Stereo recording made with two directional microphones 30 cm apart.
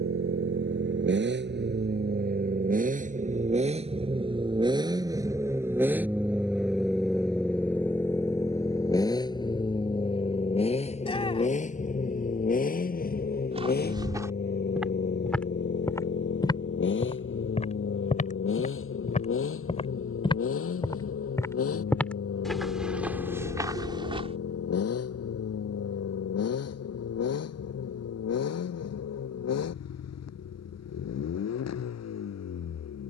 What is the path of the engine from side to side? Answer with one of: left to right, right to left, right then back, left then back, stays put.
right to left.